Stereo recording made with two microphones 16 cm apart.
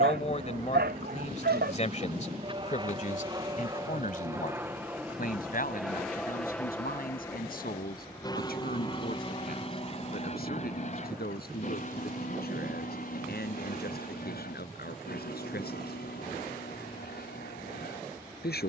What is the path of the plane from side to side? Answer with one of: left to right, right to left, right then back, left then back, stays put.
right to left.